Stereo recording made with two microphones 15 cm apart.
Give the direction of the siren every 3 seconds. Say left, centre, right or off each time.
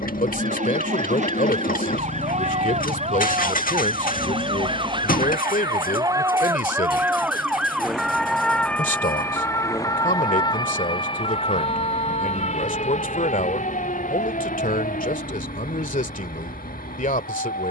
right, right, centre, left, left, left.